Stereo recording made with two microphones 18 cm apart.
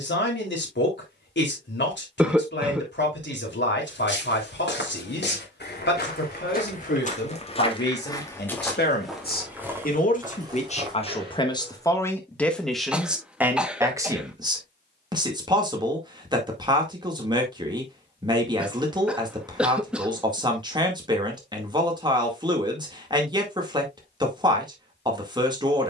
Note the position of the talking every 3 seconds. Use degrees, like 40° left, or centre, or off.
80° left, 80° left, 70° left, 40° left, 10° right, 20° right, 20° right, 20° right, 20° right.